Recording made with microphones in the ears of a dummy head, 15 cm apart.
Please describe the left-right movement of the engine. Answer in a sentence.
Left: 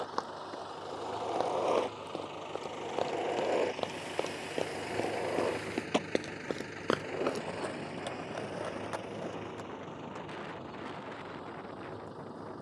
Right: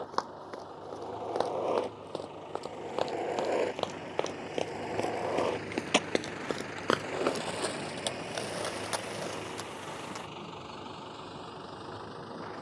You can hear the engine move to the right.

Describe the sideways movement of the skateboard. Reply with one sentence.
In this clip you hear the skateboard move to the right.